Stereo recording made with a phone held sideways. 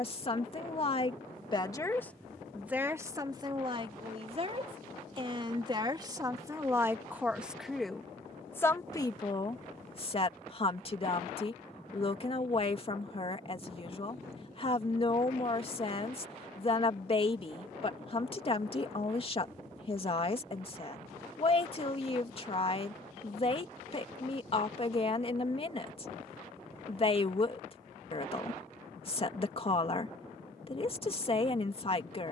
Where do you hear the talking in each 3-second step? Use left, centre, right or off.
left, right, centre, left, left, left, left, left, left, left, left.